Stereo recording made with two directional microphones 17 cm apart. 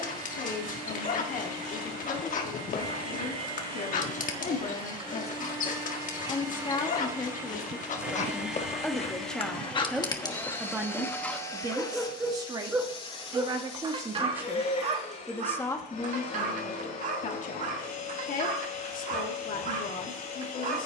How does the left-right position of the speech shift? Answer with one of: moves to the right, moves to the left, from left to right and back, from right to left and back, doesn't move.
from left to right and back.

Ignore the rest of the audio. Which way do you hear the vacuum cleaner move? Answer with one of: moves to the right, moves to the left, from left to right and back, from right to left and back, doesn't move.
moves to the left.